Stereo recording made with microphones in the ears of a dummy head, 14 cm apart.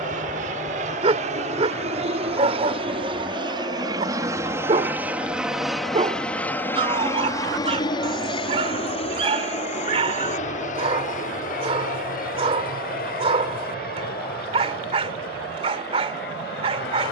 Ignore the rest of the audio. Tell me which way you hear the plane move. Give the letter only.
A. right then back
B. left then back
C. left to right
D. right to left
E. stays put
D.